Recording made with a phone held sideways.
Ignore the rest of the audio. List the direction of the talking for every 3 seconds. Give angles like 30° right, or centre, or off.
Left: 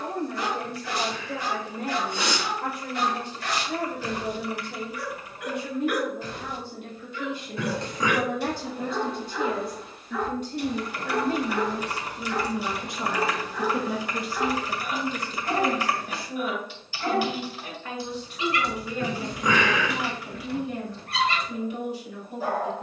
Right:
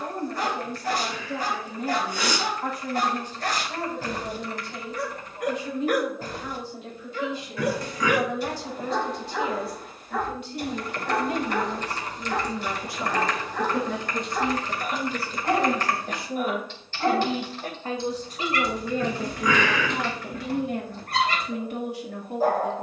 70° left, 60° left, 60° left, 40° left, 10° left, 20° right, 50° right, 60° right.